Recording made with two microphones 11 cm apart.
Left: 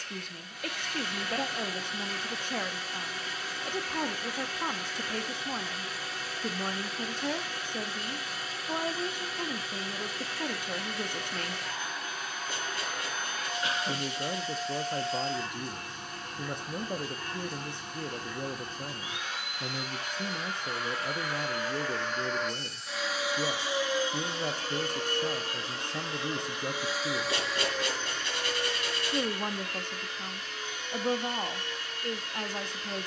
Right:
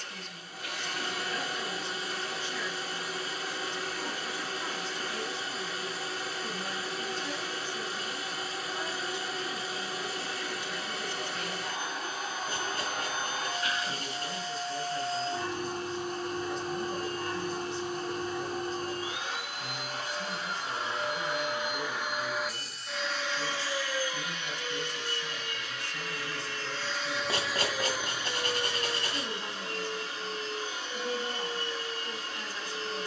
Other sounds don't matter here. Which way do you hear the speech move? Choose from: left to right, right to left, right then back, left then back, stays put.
stays put.